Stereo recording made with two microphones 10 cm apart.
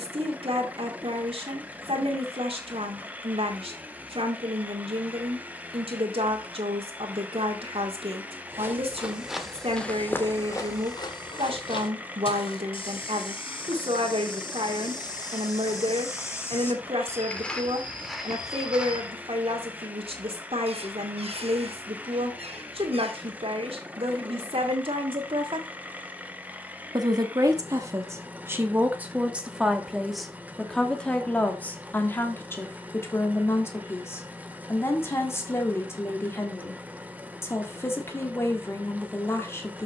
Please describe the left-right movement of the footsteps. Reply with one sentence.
In this clip you hear the footsteps move from right to left and back again.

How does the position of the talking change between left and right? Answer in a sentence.
You can hear the talking travel towards the left.